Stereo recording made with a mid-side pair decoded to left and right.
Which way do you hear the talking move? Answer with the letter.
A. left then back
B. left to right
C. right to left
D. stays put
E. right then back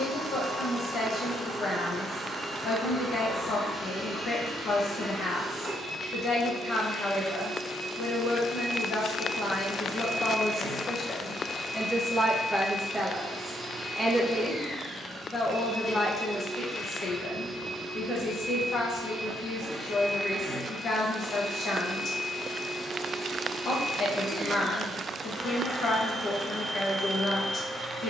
E.